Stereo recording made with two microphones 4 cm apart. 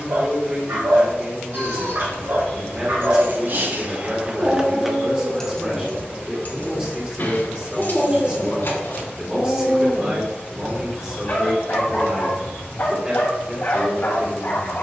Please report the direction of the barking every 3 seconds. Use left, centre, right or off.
right, right, centre, left, left.